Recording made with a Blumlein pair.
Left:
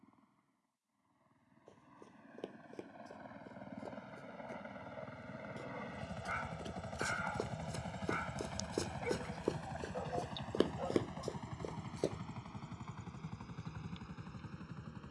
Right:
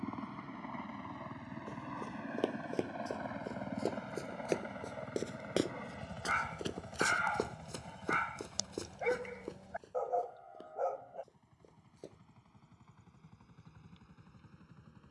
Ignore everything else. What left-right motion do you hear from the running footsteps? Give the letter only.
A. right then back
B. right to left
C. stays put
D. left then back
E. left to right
B.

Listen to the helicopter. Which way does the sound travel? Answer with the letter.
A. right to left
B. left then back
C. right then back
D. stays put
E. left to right
A.